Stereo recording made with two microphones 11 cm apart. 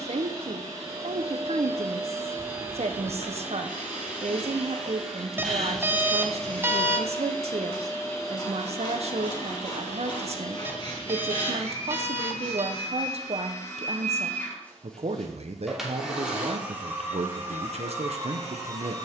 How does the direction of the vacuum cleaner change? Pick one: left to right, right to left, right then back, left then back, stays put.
left then back.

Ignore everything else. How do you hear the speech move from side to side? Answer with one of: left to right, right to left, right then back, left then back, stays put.
stays put.